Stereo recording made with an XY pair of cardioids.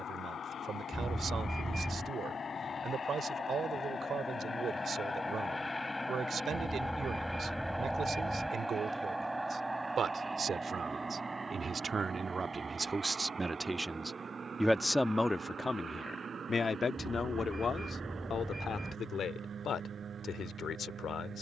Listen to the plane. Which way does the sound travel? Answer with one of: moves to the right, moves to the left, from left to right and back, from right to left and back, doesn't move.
moves to the right.